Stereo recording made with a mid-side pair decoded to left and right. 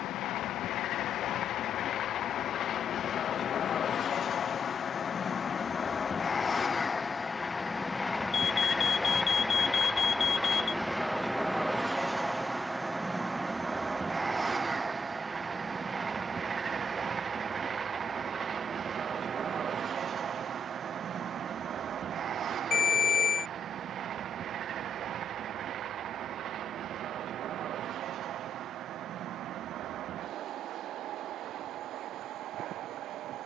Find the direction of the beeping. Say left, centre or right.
left.